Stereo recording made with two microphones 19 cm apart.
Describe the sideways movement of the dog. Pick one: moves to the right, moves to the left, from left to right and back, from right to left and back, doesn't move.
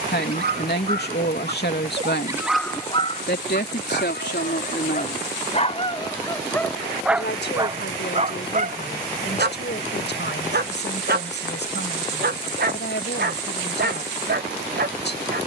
from right to left and back.